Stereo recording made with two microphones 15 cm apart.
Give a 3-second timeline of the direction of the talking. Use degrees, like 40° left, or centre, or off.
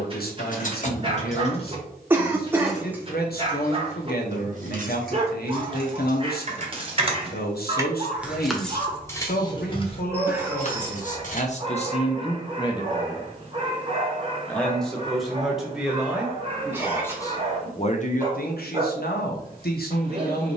80° left, 80° left, 80° left, 60° left, 20° left, 10° left, 70° left.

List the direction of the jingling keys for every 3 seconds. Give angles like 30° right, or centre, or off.
30° left, 40° right, 20° right, 40° left, off, off, off.